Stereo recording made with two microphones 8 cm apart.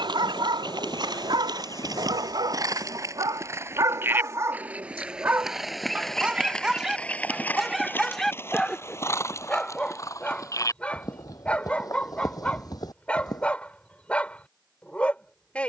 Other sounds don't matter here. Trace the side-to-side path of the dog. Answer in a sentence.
In this clip you hear the dog travel towards the left.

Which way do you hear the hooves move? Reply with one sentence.
In this clip you hear the hooves move to the left.